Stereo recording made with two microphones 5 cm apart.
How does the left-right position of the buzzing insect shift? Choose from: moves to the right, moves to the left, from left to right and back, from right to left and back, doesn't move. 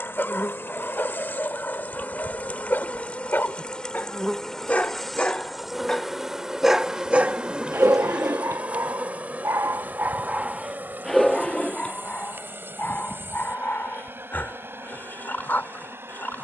moves to the right.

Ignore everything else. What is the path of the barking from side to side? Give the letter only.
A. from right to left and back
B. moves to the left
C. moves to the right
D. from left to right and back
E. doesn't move
D.